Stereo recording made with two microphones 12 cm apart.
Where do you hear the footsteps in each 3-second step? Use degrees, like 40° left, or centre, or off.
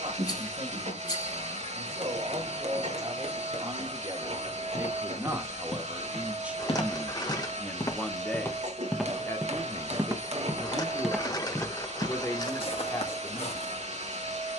off, 60° left, 30° left, centre, 60° left.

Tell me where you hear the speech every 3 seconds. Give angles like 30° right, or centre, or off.
60° right, 30° right, centre, 30° left, 30° left.